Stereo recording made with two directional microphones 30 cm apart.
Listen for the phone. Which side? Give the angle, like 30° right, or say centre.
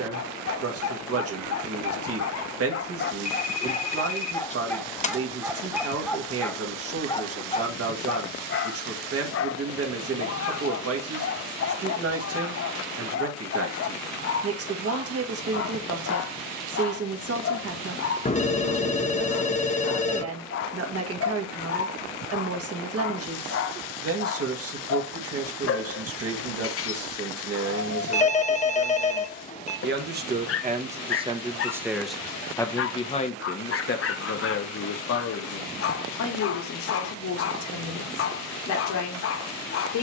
20° left.